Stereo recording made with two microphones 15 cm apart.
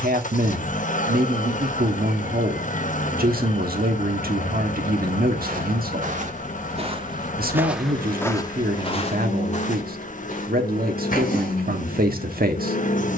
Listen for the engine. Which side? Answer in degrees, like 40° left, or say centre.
60° left.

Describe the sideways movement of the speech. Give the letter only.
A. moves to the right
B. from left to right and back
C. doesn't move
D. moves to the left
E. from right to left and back
C.